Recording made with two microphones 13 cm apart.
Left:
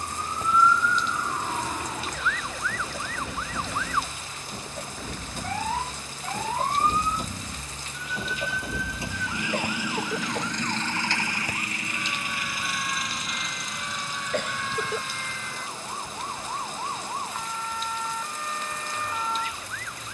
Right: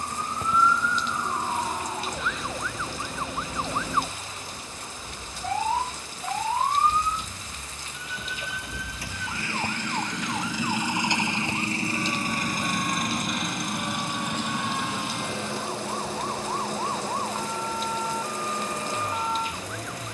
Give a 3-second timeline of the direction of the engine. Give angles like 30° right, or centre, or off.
70° left, 60° left, 40° left, centre, 50° right, 70° right, 80° right.